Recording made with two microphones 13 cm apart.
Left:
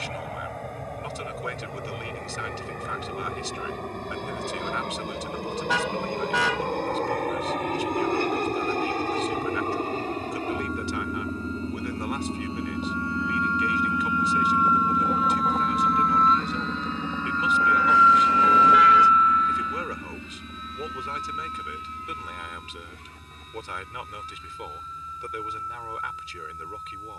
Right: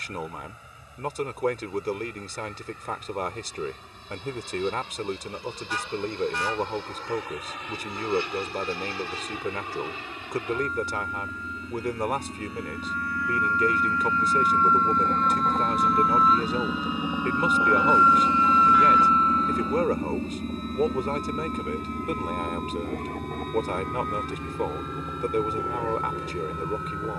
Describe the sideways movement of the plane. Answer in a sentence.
In this clip you hear the plane go from the left side to the right.